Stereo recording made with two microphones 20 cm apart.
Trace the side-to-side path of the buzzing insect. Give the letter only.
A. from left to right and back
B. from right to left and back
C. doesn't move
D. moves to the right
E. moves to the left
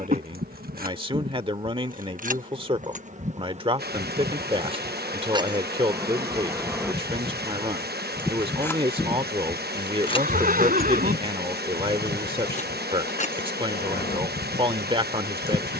E.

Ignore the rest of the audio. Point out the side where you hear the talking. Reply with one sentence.
In this clip you hear the talking on the right.